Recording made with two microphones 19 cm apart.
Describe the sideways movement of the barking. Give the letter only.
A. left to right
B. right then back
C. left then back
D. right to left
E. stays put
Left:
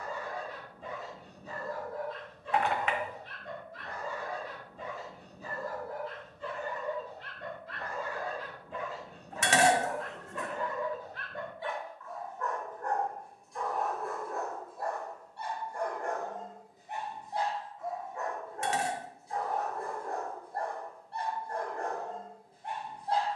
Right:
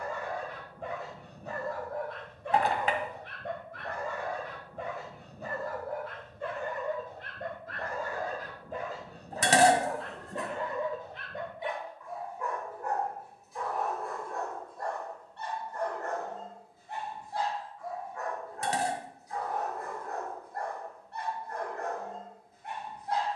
D.